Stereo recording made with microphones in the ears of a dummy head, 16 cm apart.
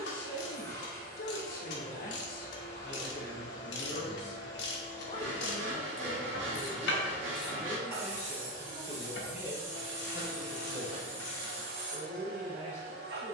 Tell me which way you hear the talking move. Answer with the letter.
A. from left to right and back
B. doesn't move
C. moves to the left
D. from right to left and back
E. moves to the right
E.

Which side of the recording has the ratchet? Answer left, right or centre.
left.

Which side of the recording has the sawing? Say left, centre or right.
right.